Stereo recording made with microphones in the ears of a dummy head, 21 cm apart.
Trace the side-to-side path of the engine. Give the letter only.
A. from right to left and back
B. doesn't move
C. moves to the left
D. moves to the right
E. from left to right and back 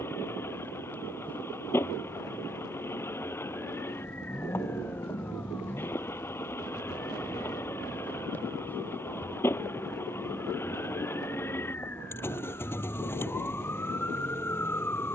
B.